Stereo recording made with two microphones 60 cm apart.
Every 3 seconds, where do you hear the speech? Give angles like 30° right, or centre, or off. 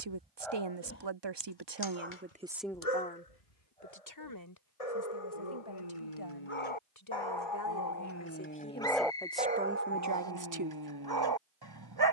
30° right, 30° left, 30° left, 20° right.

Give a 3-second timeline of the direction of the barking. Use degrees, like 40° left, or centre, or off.
30° left, 70° left, 40° left, 30° right.